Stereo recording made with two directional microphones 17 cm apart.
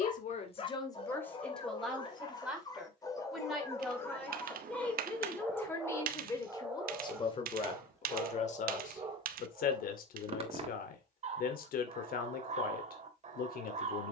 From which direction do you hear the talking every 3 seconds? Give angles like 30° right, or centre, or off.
10° left, 10° left, 30° left, 60° left, 60° left.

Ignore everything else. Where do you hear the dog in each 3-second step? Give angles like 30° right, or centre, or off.
30° left, 10° left, 10° right, 30° right, 40° right.